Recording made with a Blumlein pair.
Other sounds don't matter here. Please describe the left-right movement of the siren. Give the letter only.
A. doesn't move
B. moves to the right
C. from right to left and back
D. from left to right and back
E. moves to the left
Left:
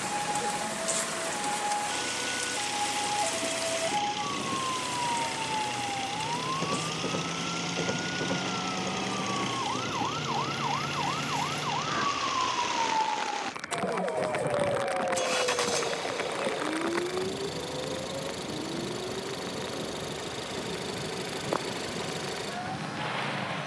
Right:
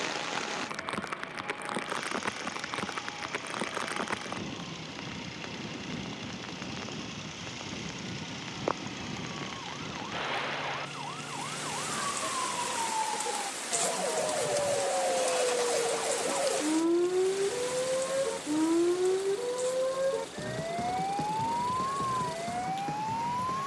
B.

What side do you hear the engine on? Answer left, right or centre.
left.